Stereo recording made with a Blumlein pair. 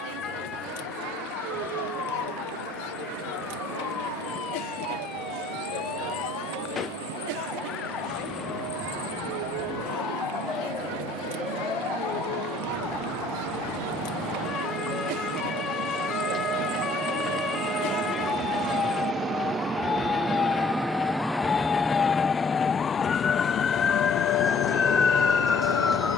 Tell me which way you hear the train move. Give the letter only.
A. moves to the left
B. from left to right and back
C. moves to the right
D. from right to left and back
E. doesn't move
A.